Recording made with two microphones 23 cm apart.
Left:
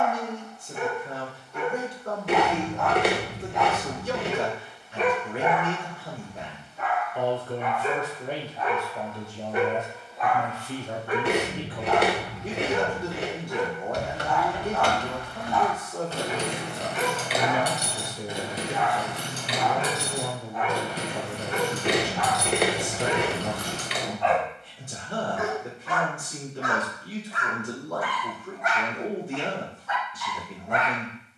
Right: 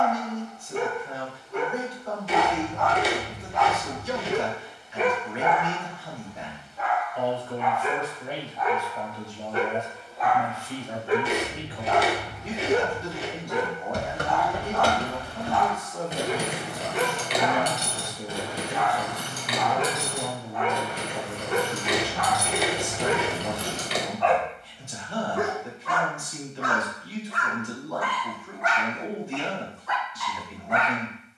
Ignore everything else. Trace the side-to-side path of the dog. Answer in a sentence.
In this clip you hear the dog move from right to left and back again.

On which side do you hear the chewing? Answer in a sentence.
You can hear the chewing on the left.